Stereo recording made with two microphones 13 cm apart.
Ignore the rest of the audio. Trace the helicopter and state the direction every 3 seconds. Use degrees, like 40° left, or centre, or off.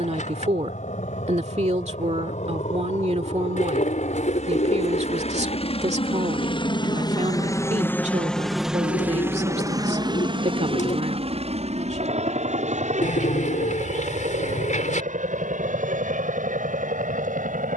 70° left, 60° left, 20° left, 40° right, 60° right, 70° right.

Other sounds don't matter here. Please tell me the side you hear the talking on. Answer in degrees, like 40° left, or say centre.
60° right.